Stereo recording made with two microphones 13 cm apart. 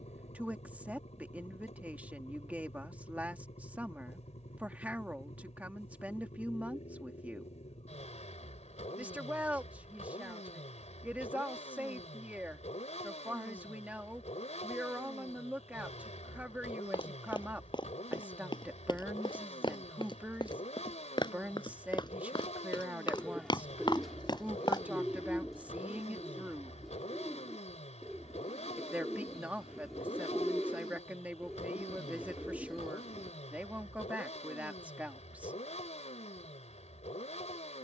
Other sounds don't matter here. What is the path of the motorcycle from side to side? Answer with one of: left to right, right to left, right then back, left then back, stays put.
stays put.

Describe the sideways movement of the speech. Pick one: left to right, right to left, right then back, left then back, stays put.
stays put.